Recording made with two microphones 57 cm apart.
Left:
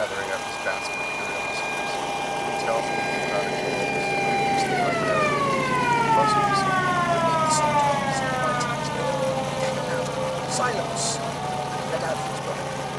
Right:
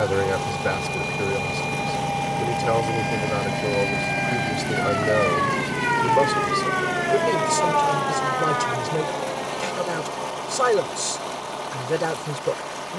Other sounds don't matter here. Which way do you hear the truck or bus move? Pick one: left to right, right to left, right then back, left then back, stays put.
right to left.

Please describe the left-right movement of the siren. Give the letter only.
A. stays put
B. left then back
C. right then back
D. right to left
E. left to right
D.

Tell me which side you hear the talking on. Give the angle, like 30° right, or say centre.
80° right.